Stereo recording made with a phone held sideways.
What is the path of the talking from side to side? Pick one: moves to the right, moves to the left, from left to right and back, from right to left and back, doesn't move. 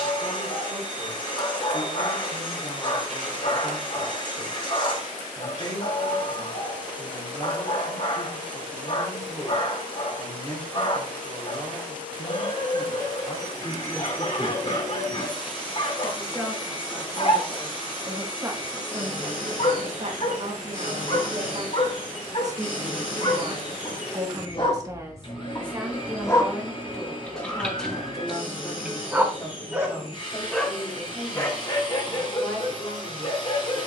from left to right and back.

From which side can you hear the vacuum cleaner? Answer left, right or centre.
left.